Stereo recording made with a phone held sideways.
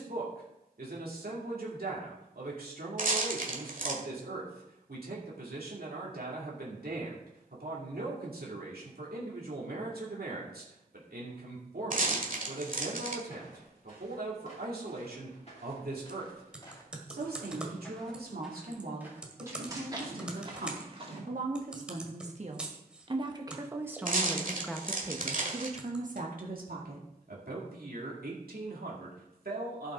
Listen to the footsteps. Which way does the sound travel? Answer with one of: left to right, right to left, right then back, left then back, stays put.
left to right.